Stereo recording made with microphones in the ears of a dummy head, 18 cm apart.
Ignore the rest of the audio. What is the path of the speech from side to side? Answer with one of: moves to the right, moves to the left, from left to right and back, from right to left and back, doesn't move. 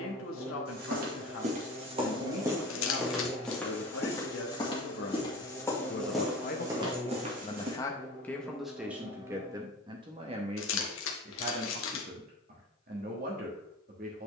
moves to the right.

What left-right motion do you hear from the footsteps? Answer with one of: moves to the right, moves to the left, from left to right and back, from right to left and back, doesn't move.
from right to left and back.